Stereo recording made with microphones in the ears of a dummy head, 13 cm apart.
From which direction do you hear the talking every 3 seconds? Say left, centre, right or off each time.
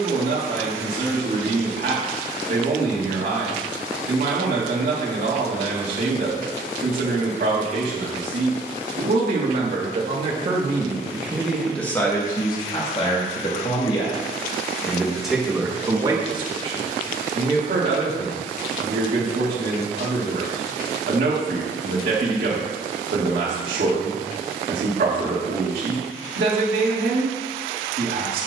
right, right, right, right, left, right, right, right, right, right.